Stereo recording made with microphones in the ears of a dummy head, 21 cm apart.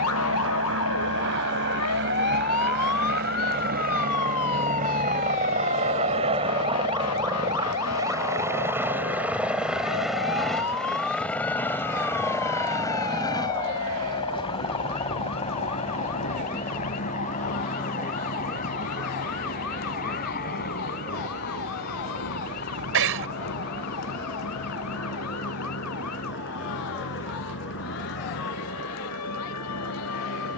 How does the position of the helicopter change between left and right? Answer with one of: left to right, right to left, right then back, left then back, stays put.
right to left.